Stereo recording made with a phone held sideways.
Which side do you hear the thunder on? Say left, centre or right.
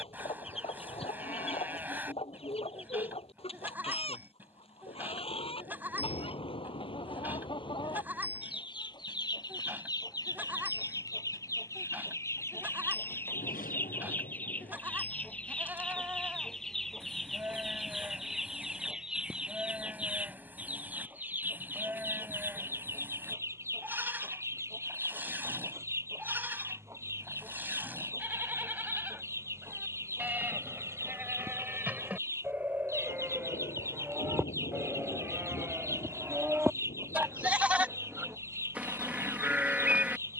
left.